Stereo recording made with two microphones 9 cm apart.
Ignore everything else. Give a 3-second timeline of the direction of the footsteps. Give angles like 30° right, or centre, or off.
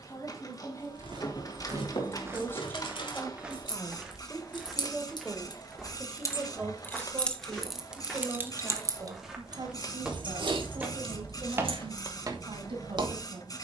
30° right, centre, centre, 10° right, 50° right.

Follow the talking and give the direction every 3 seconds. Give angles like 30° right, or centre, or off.
30° left, centre, 30° right, 50° right, 60° right.